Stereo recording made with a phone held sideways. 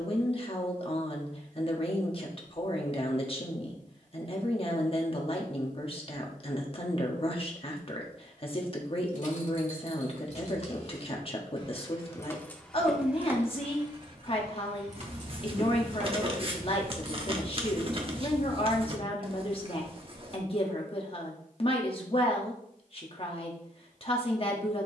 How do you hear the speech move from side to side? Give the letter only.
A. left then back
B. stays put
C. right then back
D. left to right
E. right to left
B.